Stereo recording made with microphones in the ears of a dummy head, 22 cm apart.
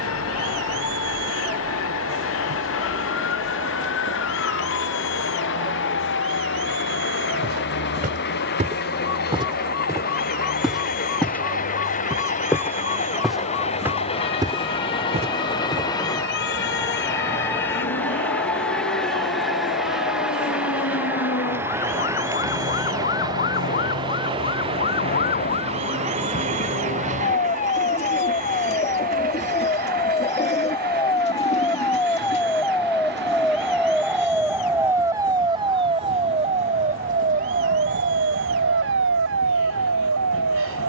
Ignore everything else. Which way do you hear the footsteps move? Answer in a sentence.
You can hear the footsteps move from right to left and back again.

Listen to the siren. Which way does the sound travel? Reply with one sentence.
In this clip you hear the siren move to the right.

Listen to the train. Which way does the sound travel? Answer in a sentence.
In this clip you hear the train move from left to right.